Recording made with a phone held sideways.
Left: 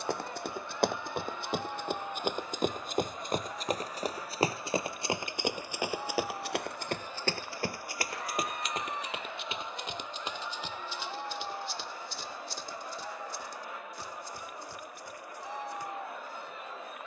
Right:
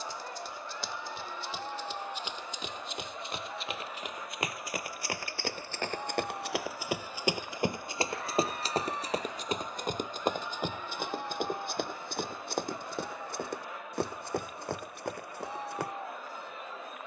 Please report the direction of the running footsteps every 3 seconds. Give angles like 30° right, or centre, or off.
60° left, 30° left, 20° right, 50° right, 60° right, 70° right.